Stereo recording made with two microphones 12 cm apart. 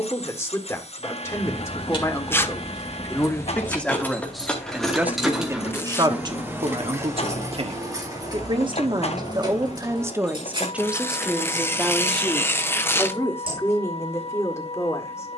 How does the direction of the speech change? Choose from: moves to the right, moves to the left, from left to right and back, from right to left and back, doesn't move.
from left to right and back.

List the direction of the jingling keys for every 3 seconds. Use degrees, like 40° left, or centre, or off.
40° left, 10° left, 30° right, 40° right, 50° right.